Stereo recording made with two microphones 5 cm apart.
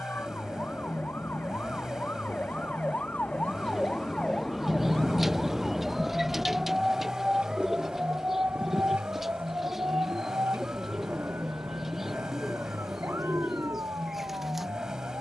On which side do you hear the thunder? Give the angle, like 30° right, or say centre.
10° right.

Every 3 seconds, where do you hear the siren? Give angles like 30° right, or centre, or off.
50° left, 20° left, 20° right, 50° right, 70° right.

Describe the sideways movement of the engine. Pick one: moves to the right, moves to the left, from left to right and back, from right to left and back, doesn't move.
doesn't move.